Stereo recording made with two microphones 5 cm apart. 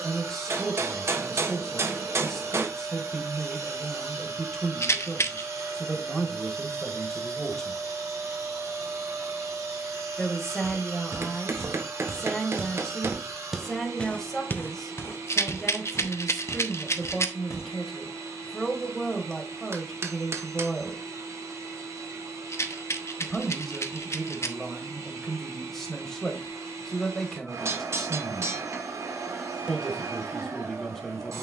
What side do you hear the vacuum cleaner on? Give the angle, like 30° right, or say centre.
80° right.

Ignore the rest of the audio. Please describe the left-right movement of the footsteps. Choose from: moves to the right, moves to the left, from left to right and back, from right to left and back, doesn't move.
moves to the left.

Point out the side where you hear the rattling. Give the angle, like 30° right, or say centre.
60° left.